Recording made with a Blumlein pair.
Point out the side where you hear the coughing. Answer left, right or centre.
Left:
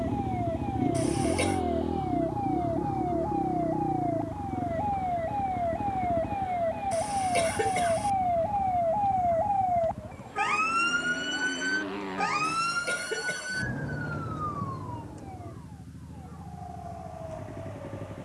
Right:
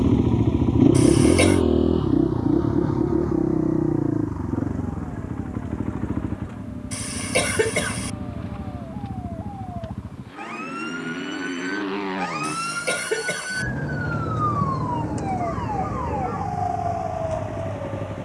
right.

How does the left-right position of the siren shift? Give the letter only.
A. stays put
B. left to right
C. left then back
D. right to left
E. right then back
B.